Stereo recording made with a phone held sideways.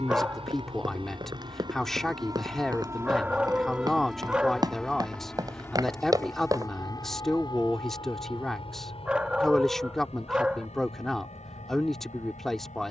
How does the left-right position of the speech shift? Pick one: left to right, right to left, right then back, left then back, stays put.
stays put.